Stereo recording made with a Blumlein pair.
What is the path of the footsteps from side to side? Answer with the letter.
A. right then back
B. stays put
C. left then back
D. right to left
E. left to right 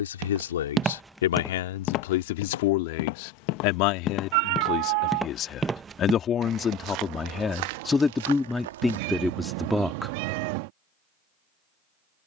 C.